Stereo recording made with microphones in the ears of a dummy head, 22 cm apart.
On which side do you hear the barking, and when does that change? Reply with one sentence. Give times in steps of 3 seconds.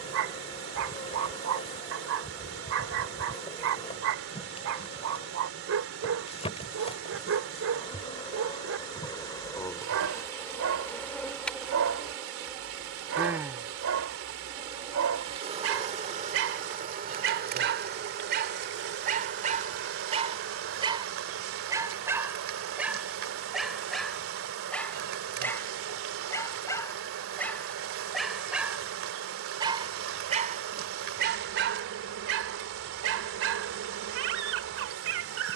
You can hear the barking on the right from 0 s, in the centre from 21 s and on the right from 30 s.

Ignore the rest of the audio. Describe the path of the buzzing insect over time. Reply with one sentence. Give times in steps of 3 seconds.
You can hear the buzzing insect on the left from 0 s, in the centre from 9 s and on the right from 15 s.